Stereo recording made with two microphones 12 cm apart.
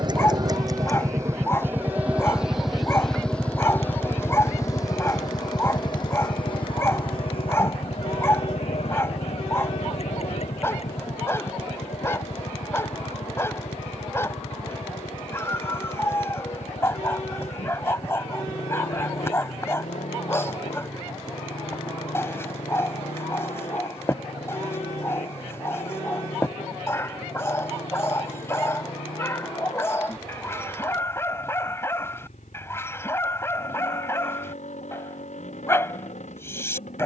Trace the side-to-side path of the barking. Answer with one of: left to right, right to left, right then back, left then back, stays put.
stays put.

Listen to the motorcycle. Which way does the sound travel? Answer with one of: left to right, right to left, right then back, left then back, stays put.
right to left.